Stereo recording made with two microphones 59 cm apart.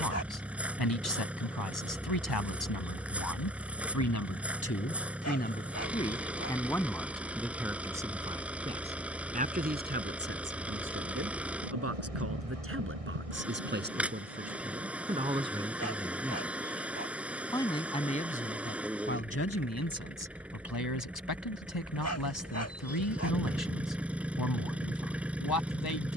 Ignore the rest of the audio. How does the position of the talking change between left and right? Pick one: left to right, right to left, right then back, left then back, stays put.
right then back.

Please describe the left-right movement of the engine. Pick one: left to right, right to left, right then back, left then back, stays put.
stays put.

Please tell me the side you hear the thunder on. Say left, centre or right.
right.